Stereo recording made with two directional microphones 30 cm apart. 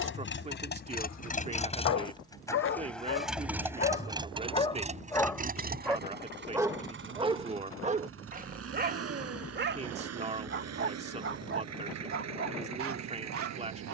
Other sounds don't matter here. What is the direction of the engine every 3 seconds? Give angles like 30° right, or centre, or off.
20° left, 20° right, 40° right, 60° right, 60° right.